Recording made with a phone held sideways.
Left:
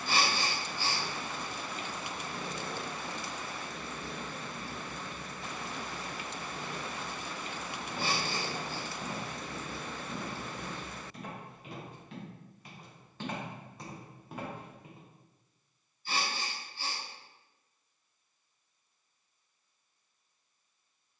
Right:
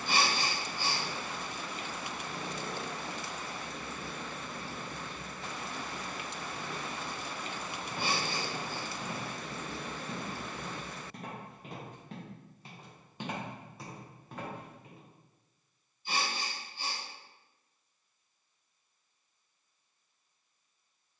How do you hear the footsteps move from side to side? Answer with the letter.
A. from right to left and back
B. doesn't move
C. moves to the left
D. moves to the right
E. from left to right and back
E.